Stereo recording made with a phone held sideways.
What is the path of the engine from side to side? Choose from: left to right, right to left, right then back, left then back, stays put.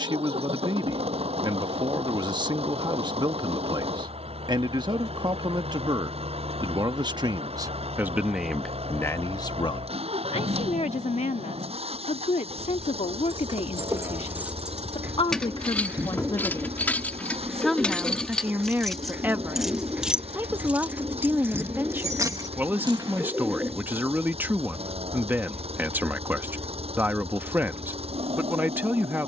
stays put.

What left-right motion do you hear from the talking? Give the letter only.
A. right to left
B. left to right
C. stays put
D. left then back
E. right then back
D.